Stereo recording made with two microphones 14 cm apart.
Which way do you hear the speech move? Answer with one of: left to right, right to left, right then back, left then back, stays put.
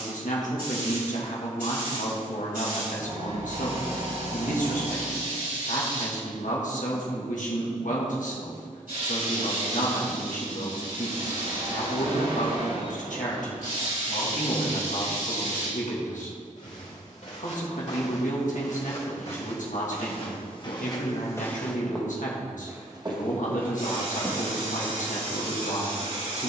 stays put.